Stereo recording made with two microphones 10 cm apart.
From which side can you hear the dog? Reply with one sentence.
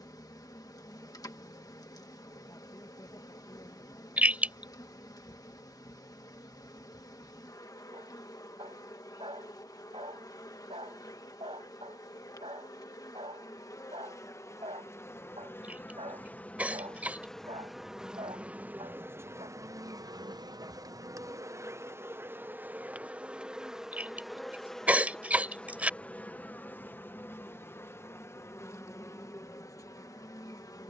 You can hear the dog on the right.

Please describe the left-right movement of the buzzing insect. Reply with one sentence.
You can hear the buzzing insect go right and come back.